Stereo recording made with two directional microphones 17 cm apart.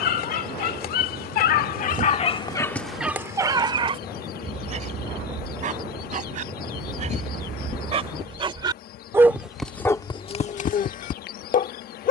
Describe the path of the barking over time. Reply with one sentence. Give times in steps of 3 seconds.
You can hear the barking on the left from 0 s, on the right from 3 s and on the left from 9 s.